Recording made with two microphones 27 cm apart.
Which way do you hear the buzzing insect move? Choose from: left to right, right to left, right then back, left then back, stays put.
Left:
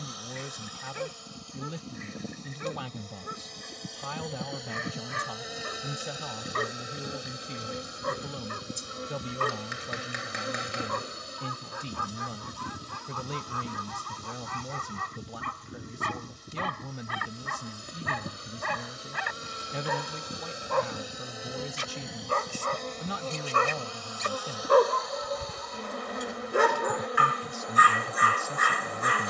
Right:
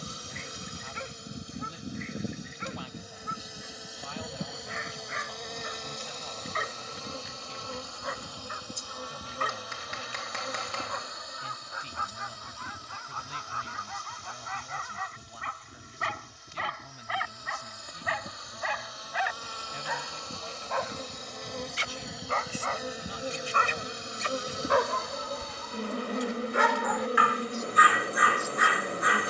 left then back.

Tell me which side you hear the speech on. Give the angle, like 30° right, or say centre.
80° left.